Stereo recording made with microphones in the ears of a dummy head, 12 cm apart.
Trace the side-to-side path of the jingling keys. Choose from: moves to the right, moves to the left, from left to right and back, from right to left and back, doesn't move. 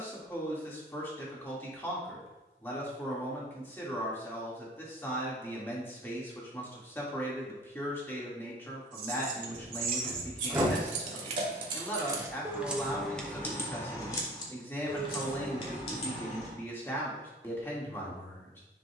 moves to the left.